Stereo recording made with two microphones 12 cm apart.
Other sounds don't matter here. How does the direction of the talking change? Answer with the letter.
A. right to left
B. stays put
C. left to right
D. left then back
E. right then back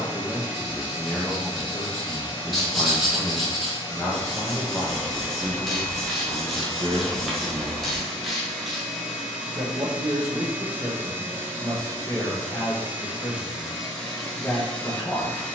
E.